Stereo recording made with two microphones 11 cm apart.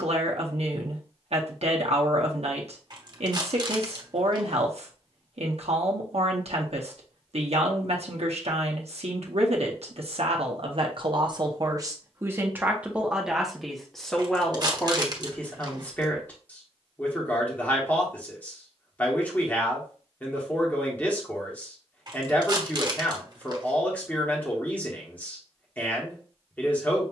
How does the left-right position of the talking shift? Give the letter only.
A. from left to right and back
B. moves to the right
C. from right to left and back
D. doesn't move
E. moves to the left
E.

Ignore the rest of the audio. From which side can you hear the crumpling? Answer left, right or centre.
right.